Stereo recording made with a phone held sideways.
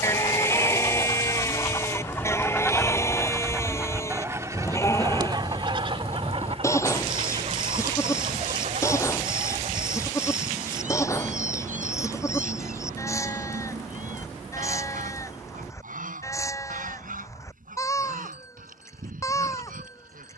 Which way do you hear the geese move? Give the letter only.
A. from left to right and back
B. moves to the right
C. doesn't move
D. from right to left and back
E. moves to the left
B.